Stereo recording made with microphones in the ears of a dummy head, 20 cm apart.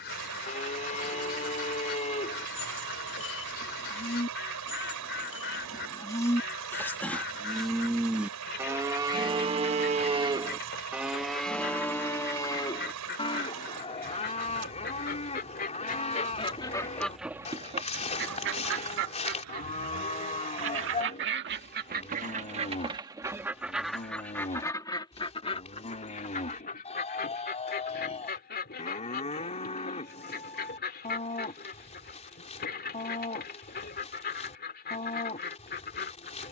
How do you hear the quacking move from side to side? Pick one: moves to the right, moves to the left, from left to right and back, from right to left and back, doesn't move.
from left to right and back.